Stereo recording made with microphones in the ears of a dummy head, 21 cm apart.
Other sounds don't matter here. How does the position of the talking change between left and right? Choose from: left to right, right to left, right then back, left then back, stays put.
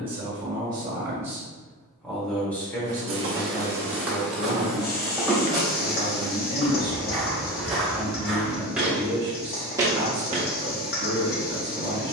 left then back.